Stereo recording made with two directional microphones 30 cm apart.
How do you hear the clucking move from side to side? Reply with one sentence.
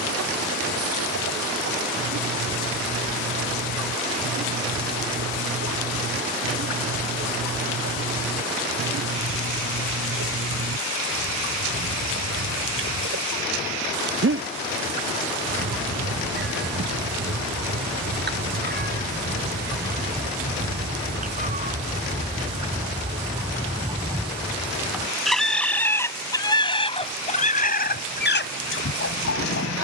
You can hear the clucking travel towards the left.